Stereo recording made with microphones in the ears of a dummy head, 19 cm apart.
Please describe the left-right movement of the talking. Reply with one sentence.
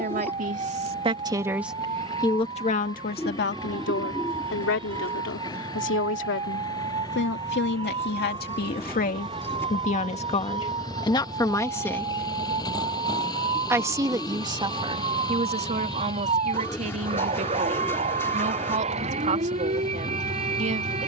In this clip you hear the talking go left and come back.